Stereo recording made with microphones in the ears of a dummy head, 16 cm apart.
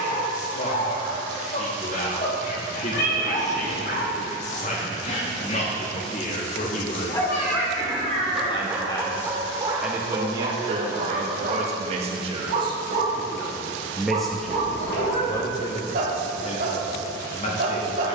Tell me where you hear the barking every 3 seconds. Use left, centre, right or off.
left, left, centre, right, right, right.